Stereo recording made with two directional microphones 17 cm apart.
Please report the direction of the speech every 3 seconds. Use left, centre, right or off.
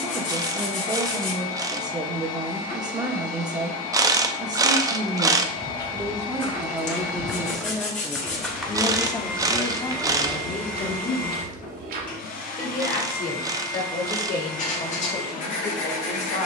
right, right, centre, left, left, left.